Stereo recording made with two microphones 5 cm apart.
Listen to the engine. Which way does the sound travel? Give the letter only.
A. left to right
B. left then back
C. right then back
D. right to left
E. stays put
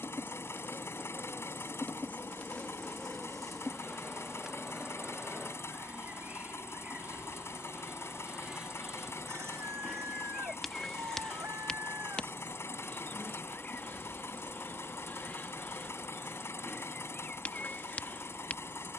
E.